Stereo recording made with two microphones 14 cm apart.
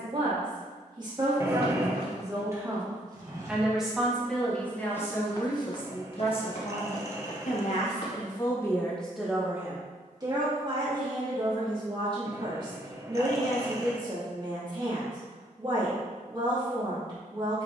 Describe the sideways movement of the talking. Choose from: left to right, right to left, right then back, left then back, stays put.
left then back.